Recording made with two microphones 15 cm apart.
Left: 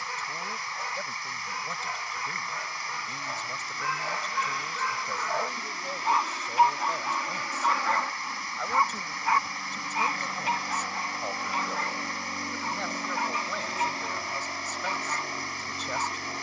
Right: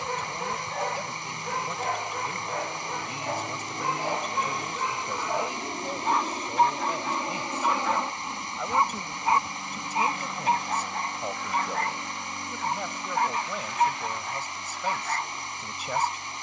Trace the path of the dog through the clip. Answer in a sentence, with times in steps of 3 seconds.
In this clip you hear the dog on the right from 0 s, in the centre from 6 s and on the right from 9 s.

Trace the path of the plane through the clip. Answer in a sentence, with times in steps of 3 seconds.
In this clip you hear the plane on the right from 0 s, in the centre from 9 s and on the left from 12 s.